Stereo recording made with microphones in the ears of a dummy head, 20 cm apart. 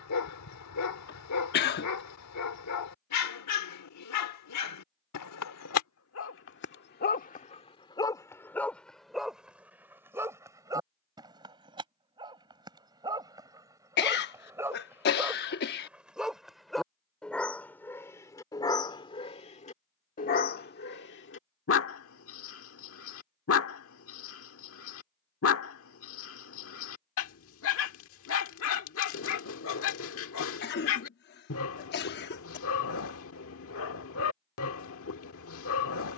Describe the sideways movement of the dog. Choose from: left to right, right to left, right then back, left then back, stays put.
right then back.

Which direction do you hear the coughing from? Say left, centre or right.
left.